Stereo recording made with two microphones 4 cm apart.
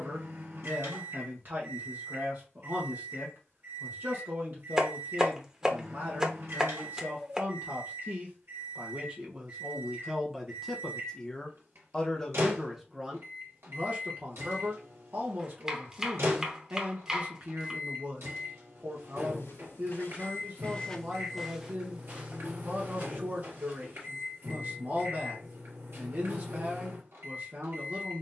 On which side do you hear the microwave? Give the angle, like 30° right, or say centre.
70° right.